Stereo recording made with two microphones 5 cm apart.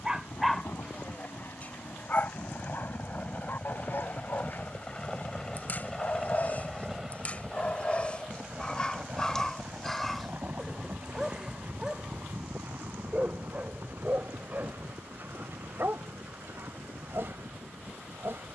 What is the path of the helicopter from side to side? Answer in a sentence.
You can hear the helicopter move from left to right.